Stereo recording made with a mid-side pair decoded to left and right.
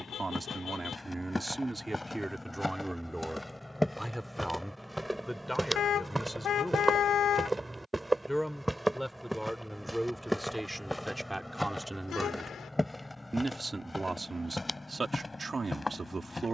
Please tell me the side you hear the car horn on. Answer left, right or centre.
left.